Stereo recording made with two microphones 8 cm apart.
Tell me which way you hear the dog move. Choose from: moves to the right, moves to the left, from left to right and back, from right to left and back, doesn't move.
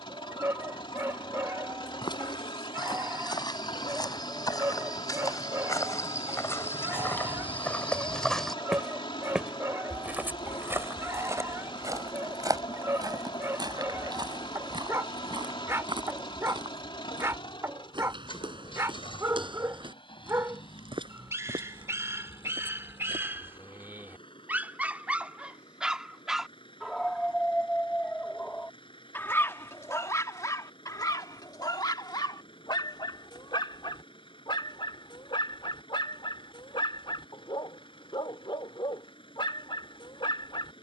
moves to the left.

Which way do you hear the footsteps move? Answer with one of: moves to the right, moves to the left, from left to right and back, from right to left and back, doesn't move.
moves to the right.